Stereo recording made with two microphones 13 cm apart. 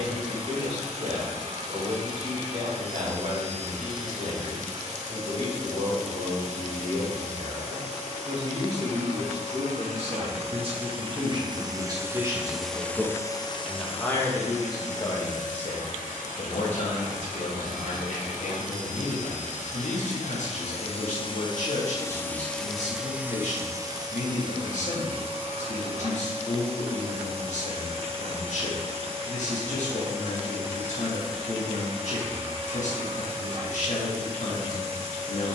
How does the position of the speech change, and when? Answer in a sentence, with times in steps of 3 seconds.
In this clip you hear the speech on the right from 0 s, in the centre from 12 s and on the left from 15 s.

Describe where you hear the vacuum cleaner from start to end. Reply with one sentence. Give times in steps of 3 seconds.
You can hear the vacuum cleaner on the right from 0 s, on the left from 12 s, in the centre from 21 s and on the right from 24 s.